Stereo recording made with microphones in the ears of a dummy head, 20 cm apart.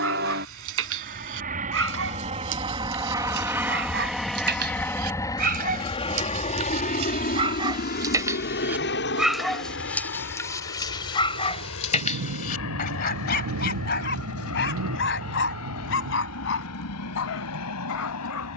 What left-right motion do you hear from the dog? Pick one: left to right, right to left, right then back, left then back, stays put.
right to left.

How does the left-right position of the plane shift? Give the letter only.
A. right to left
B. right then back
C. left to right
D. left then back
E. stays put
A.